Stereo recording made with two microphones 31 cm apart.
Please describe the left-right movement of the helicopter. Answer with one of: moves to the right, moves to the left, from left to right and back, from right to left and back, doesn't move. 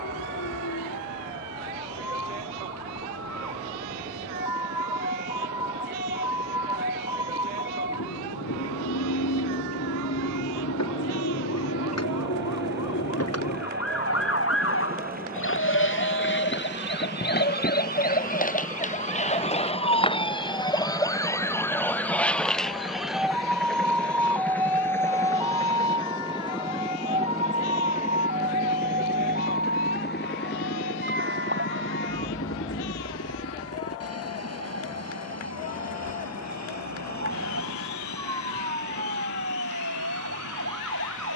moves to the left.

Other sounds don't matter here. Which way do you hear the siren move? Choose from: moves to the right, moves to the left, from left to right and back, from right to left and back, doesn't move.
moves to the right.